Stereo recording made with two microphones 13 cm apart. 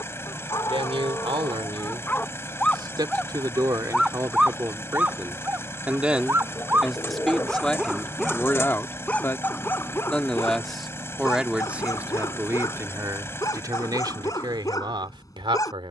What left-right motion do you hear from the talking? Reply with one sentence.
You can hear the talking move from right to left and back again.